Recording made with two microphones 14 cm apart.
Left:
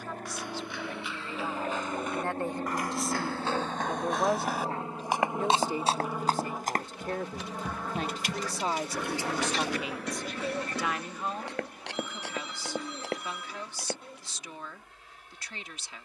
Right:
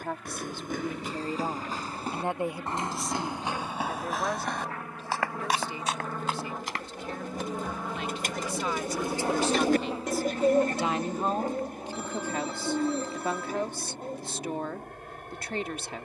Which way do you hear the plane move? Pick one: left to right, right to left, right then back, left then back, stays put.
left to right.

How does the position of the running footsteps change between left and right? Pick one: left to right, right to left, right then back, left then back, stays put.
right to left.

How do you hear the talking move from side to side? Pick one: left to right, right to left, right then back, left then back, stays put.
left then back.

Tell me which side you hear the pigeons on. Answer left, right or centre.
right.